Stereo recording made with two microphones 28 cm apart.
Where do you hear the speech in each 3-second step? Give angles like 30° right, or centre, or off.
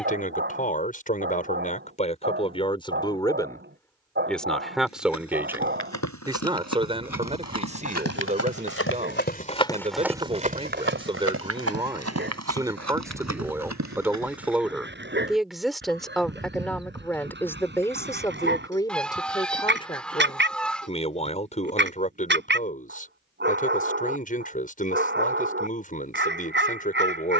30° left, centre, 20° right, 20° right, 10° right, centre, 20° left, 30° left, 30° left.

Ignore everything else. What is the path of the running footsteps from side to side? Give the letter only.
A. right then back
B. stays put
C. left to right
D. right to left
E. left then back
C.